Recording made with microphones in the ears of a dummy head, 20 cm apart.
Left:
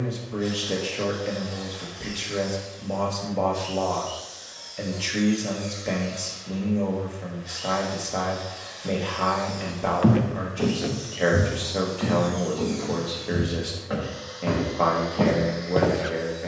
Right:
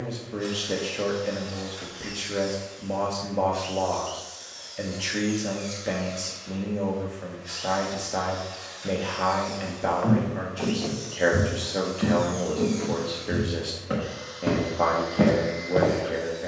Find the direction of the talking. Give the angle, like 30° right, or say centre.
centre.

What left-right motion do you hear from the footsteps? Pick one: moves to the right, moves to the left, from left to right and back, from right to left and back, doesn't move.
from left to right and back.